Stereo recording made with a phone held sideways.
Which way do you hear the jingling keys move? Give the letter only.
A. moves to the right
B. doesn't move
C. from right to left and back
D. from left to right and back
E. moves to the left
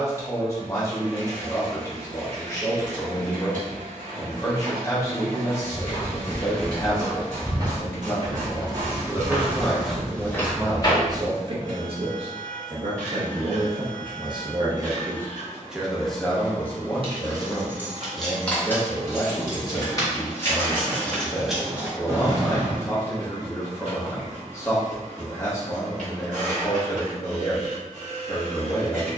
C.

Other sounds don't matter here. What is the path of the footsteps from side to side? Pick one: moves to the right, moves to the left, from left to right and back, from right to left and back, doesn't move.
from left to right and back.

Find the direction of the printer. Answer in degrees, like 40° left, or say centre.
70° right.